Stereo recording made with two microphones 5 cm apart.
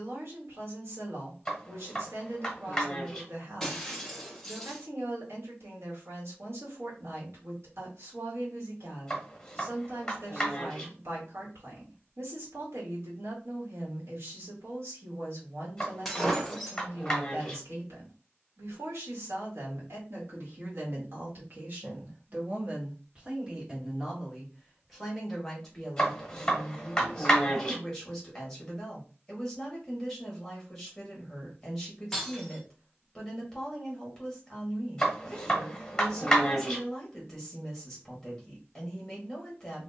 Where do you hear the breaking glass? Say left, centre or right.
centre.